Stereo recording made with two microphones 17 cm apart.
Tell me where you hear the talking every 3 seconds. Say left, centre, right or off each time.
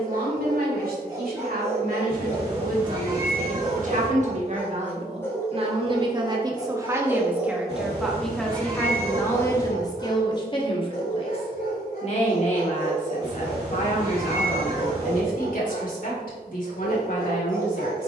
right, right, centre, left, left, left.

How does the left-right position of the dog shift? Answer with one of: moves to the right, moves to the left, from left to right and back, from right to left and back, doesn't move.
moves to the left.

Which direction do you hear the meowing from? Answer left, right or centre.
right.